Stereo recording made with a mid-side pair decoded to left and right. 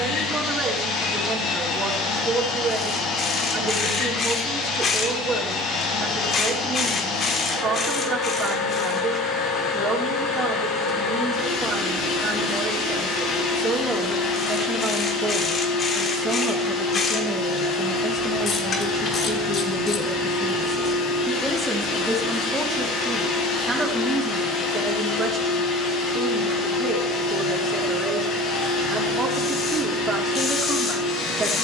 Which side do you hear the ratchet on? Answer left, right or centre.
left.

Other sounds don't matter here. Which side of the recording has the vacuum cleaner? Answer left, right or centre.
left.